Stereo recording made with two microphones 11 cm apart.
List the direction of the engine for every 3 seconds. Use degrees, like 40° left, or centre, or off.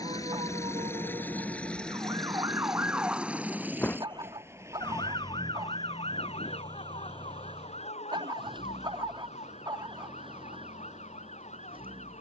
10° left, 20° right, 40° right, 50° right.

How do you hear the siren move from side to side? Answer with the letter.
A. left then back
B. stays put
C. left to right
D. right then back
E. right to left
E.